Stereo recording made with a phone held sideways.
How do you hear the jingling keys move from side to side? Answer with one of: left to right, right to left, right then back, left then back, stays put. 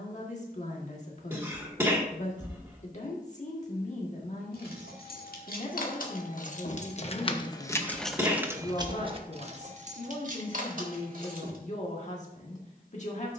left to right.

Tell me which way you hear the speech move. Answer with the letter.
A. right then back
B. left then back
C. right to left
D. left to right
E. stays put
E.